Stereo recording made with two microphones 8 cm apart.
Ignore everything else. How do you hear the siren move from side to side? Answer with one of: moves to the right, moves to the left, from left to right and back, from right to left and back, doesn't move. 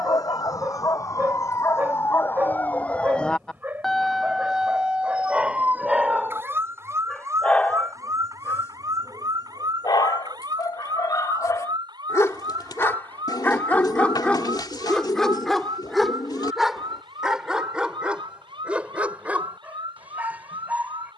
moves to the right.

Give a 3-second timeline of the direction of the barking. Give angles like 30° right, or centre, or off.
20° right, 10° right, 20° left, 50° left, 20° left, centre, 10° right.